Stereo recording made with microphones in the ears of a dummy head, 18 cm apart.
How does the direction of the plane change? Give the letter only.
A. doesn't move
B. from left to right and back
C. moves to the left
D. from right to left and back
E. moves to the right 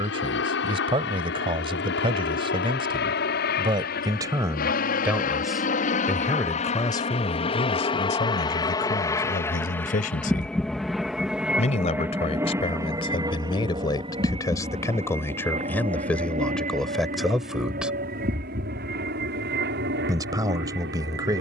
E.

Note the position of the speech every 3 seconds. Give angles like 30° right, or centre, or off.
30° right, 20° right, 30° left, 40° left, 20° left, centre, 20° right.